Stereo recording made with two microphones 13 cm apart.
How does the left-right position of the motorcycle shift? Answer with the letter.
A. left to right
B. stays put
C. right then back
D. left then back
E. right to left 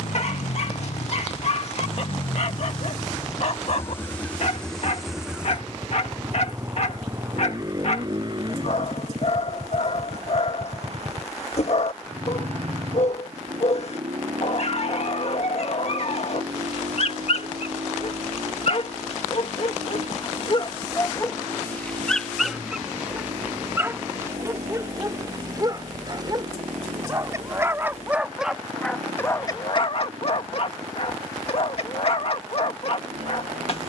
A.